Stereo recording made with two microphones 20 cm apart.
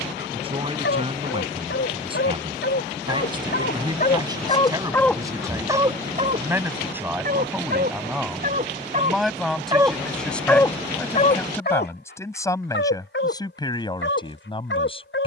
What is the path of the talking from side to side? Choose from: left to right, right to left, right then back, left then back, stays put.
right to left.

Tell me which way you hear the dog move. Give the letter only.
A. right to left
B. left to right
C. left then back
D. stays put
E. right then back
E.